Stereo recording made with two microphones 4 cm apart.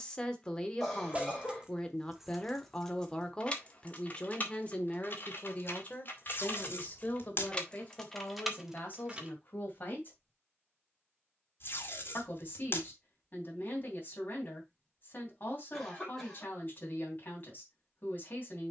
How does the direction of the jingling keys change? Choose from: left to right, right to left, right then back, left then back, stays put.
left then back.